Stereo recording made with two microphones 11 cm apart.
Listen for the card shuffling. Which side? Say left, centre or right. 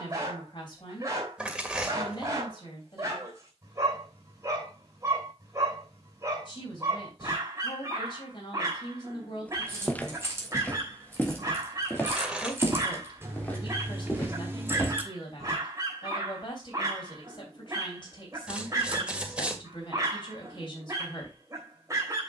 centre.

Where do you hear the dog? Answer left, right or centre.
right.